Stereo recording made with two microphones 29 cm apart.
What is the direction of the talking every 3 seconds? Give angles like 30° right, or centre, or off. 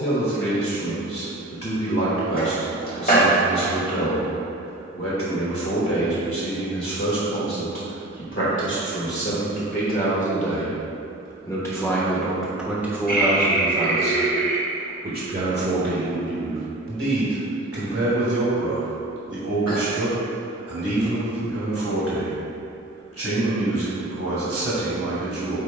50° left, 50° left, 50° left, 20° left, 10° right, 40° right, 60° right, 60° right, 60° right.